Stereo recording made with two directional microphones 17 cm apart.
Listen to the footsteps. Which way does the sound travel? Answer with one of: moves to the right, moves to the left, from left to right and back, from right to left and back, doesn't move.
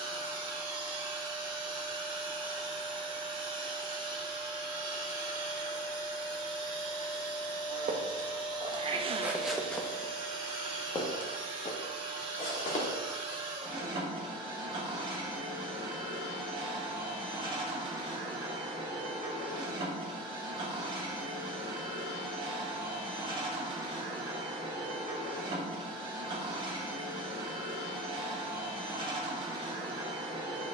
moves to the left.